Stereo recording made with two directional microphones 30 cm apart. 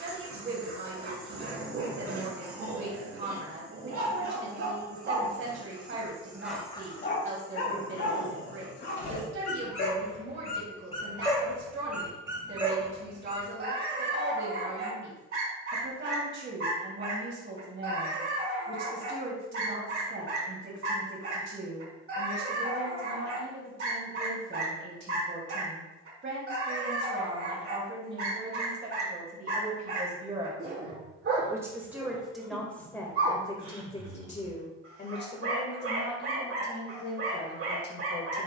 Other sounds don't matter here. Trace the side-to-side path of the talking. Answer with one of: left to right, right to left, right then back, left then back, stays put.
right to left.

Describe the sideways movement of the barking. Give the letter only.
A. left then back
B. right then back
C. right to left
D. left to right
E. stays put
A.